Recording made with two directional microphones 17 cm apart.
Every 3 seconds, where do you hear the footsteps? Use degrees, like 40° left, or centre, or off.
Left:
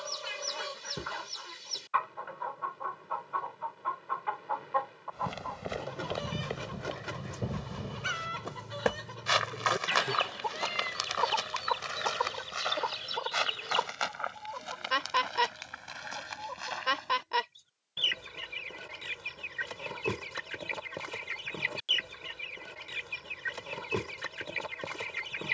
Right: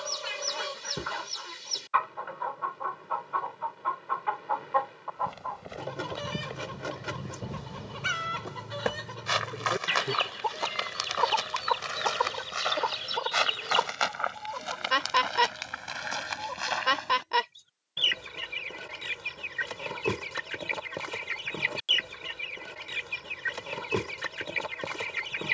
off, 40° left, 20° left, centre, 30° right, 40° right, off, off, off.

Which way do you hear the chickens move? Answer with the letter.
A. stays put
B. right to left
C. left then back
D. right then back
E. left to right
A.